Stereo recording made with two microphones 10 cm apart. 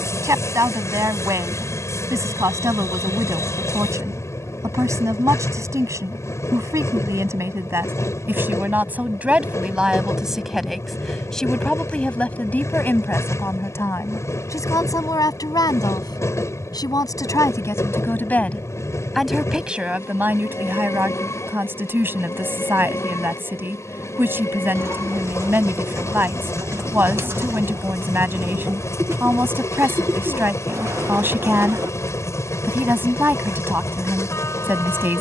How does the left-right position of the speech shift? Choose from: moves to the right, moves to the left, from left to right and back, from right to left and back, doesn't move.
from right to left and back.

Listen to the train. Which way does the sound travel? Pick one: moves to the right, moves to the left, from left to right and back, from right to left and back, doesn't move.
doesn't move.